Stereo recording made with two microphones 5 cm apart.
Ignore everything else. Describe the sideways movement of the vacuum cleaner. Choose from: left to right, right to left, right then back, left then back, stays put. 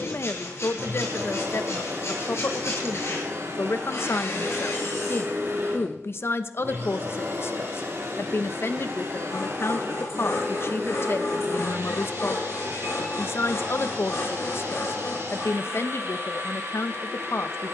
stays put.